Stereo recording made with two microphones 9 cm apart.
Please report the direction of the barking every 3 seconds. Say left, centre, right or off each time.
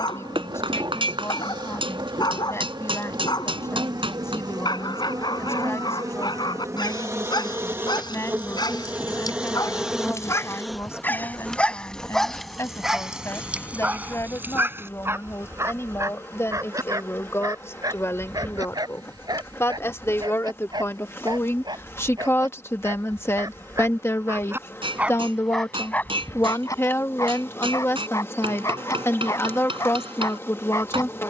left, left, left, left, centre, right, right, right, centre, left, left.